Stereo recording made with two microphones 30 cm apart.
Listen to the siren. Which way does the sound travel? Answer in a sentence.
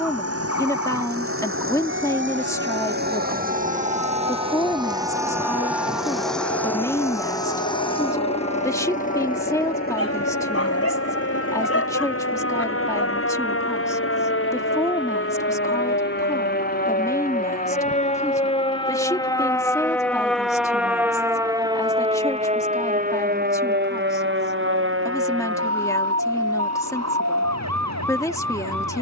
You can hear the siren travel towards the right.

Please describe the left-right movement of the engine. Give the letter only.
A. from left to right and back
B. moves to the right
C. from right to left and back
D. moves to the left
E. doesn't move
D.